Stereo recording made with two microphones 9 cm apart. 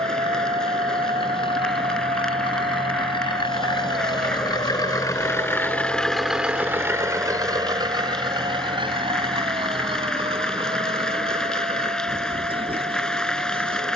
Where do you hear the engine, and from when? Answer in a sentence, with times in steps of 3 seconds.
You can hear the engine on the left from 0 s and on the right from 6 s.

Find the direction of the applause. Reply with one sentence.
You can hear the applause in the centre.